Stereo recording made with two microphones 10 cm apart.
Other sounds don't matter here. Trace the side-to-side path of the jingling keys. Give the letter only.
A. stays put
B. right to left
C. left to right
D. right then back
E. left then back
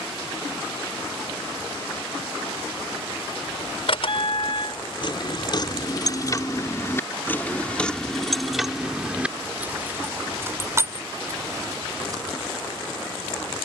C.